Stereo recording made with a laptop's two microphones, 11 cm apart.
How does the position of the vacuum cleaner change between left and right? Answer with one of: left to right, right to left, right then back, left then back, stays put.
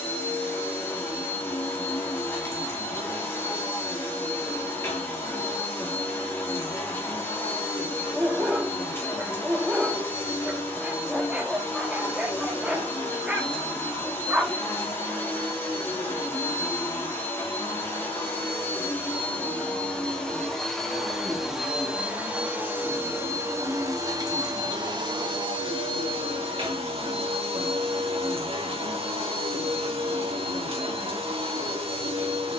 left to right.